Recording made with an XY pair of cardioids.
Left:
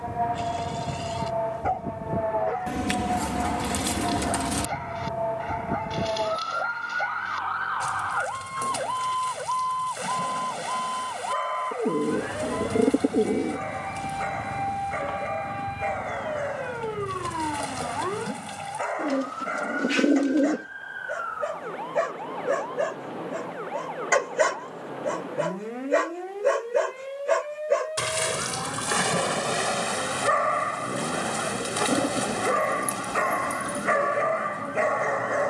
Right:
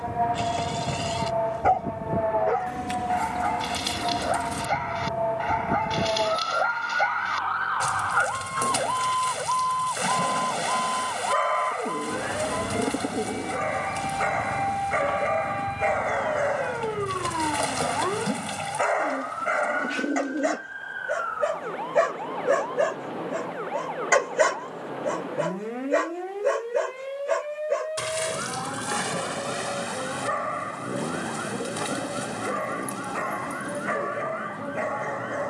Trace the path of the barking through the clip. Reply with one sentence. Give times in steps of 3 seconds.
In this clip you hear the barking on the right from 0 s, in the centre from 24 s and on the left from 27 s.